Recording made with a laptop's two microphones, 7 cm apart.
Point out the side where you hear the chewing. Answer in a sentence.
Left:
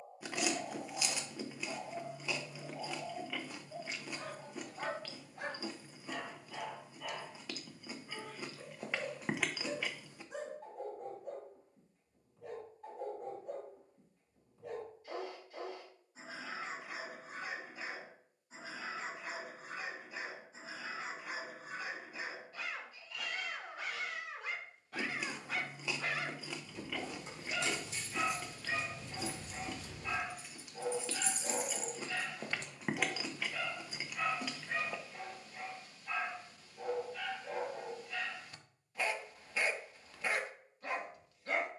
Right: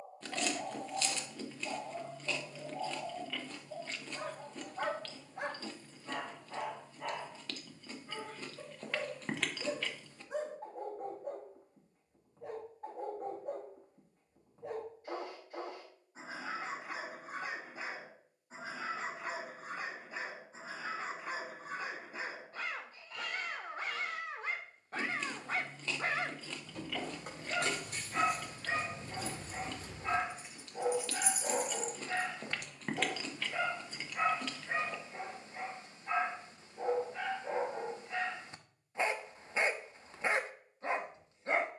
In this clip you hear the chewing in the centre.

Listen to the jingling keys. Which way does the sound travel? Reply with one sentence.
You can hear the jingling keys travel towards the left.